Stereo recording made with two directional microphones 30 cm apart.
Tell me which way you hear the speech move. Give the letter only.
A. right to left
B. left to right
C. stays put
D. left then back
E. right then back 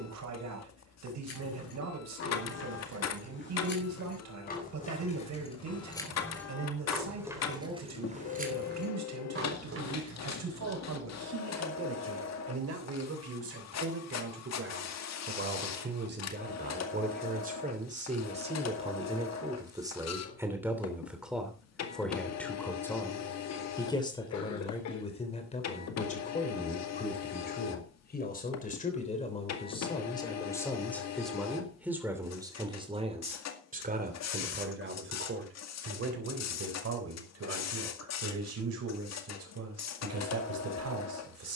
D.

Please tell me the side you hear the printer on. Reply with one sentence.
You can hear the printer on the left.